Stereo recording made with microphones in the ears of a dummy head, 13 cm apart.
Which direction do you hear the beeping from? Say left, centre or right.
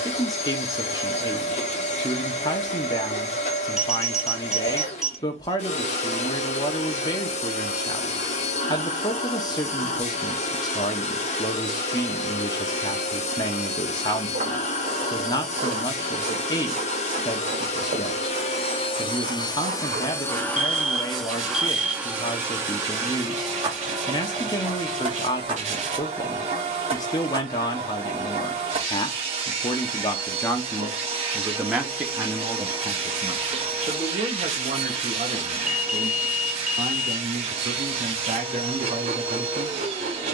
centre.